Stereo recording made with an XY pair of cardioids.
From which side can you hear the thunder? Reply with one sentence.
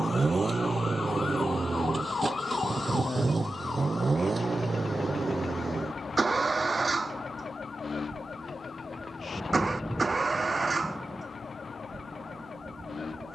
You can hear the thunder in the centre.